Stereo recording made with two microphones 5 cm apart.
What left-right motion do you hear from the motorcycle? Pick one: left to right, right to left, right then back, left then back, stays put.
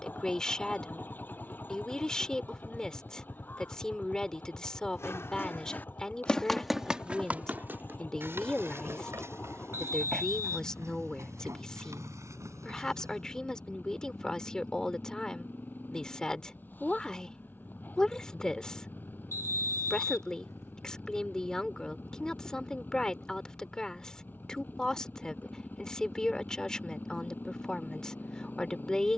stays put.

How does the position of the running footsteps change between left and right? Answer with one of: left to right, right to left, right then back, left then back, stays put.
left to right.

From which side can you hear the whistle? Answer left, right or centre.
left.